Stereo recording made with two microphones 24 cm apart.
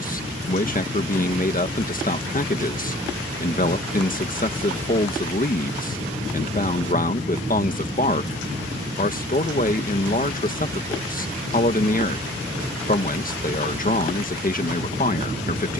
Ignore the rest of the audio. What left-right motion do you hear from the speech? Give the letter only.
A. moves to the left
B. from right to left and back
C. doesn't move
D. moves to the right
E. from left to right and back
C.